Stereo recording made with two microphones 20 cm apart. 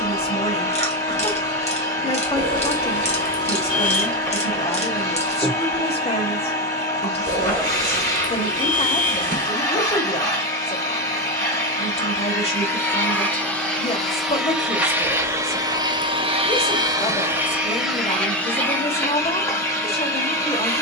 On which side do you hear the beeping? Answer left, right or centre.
right.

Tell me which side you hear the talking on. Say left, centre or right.
left.